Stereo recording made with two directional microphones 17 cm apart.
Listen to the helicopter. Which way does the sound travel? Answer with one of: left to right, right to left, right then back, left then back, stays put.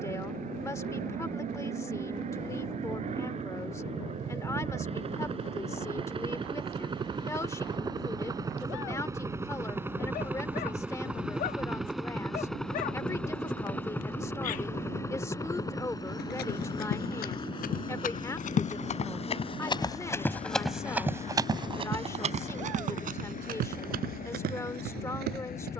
right to left.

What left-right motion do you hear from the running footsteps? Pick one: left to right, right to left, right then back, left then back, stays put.
left to right.